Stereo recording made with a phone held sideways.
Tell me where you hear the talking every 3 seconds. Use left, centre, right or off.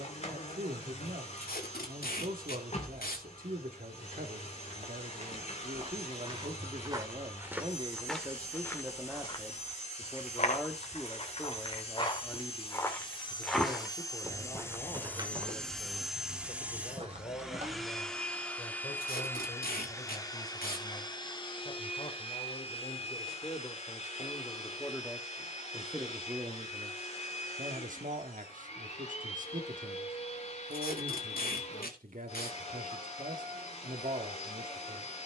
right, right, right, centre, left, left, left, left, centre, right, right, right.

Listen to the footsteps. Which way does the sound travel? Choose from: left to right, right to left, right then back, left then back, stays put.
left then back.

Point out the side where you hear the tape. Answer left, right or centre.
left.